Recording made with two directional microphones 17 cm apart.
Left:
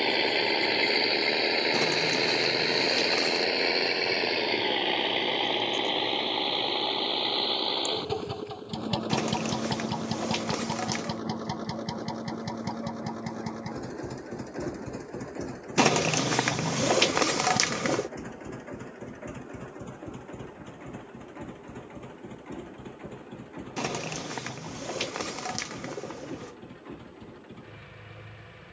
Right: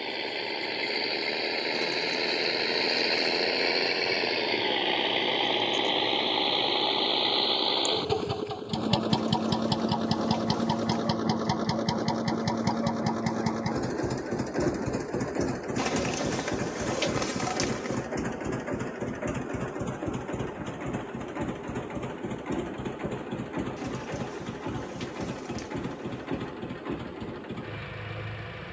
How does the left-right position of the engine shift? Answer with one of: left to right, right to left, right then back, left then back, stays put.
left to right.